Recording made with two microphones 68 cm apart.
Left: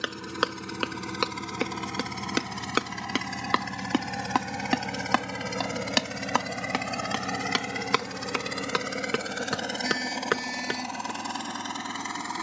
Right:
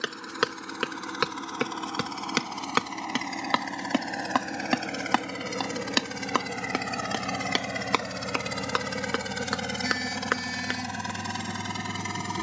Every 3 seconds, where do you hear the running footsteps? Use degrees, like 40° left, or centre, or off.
40° right, 10° right, 40° left, 60° left.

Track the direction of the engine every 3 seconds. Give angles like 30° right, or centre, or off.
50° left, 30° left, 10° right, 40° right.